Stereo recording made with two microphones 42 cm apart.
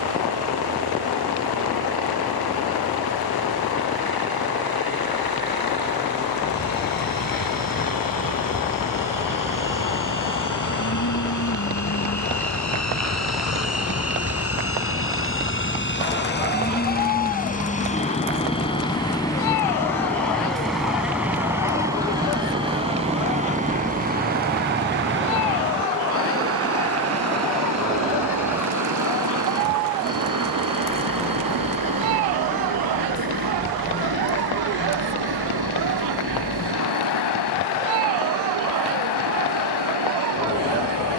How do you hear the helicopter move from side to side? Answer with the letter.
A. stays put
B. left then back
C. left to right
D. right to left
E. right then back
C.